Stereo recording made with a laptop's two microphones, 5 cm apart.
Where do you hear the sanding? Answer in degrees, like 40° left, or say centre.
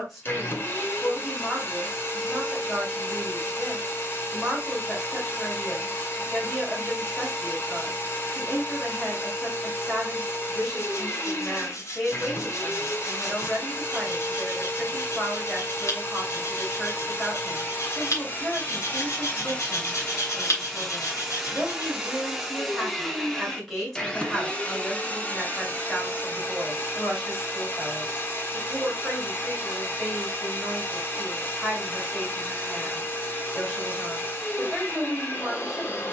70° left.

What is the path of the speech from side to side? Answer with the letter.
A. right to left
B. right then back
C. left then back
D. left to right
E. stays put
E.